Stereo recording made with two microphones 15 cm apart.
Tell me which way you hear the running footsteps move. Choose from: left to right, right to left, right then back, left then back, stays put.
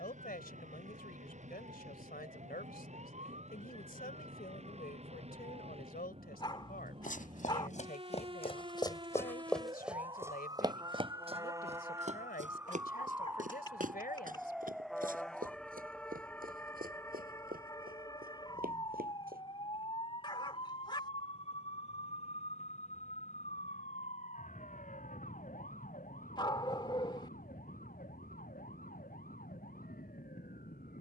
left to right.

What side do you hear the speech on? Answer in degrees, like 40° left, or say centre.
80° left.